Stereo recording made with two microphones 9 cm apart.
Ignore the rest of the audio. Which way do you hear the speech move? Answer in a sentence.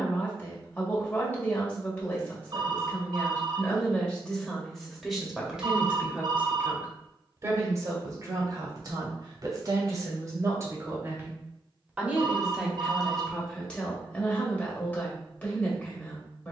You can hear the speech go right and come back.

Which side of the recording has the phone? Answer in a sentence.
You can hear the phone on the right.